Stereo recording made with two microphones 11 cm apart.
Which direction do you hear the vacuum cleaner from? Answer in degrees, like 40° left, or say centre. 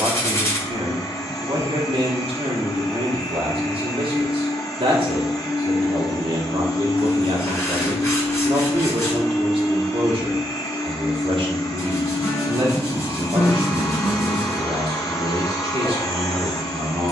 40° left.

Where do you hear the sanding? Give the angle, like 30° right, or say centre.
30° left.